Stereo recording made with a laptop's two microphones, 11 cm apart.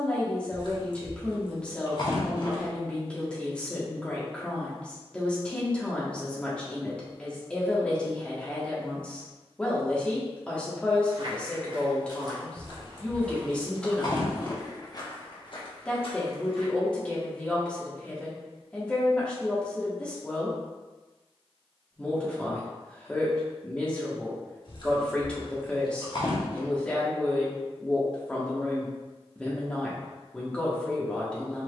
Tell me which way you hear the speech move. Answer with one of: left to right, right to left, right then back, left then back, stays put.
stays put.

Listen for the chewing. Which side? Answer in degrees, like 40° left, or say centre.
50° left.